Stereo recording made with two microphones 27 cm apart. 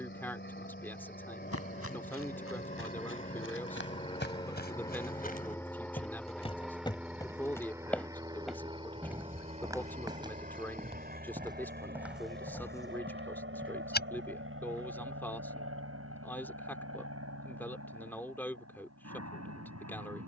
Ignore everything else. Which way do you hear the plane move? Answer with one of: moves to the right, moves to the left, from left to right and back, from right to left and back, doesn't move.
moves to the right.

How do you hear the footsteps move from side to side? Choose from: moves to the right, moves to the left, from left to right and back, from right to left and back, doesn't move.
from left to right and back.